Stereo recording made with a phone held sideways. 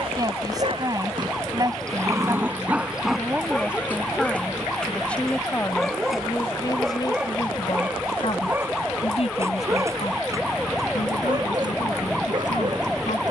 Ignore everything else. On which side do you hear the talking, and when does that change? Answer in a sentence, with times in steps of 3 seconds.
You can hear the talking on the right from 0 s, in the centre from 3 s and on the left from 6 s.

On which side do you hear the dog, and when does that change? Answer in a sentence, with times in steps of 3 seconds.
In this clip you hear the dog on the right from 0 s, in the centre from 3 s and on the right from 9 s.